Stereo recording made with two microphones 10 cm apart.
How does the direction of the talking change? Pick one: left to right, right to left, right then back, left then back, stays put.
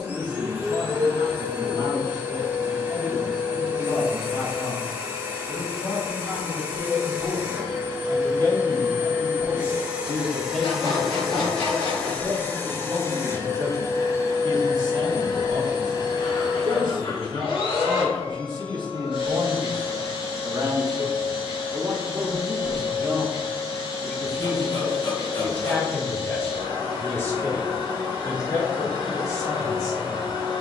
right then back.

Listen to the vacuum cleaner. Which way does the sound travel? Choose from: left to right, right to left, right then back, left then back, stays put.
right to left.